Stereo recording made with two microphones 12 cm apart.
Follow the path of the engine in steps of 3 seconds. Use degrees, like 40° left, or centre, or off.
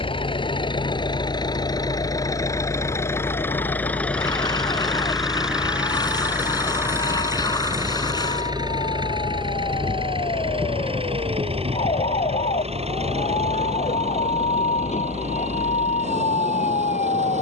30° left, 10° left, 20° right, 50° right, 60° right, 60° right.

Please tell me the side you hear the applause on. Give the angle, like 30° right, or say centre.
30° left.